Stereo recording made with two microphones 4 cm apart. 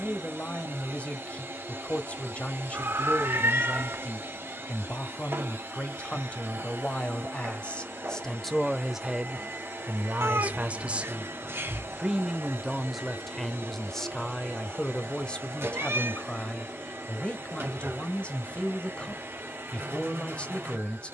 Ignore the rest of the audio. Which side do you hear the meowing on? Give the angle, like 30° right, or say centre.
70° right.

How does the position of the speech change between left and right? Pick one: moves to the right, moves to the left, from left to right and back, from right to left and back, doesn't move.
from left to right and back.